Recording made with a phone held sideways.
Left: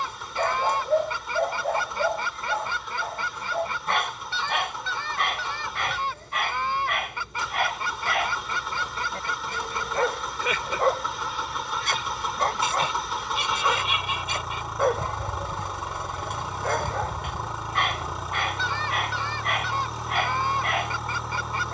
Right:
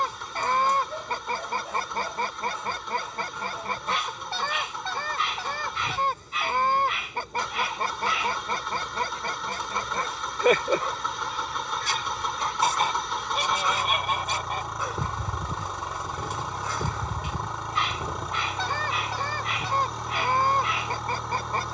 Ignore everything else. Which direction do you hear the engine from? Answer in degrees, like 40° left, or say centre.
centre.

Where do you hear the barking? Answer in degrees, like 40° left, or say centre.
60° left.